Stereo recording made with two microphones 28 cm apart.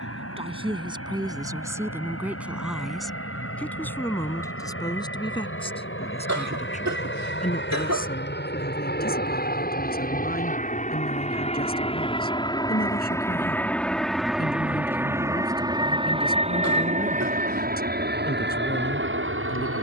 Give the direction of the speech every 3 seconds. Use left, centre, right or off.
centre, centre, left, left, left, left, left.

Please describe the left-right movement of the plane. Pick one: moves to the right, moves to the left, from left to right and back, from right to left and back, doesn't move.
moves to the right.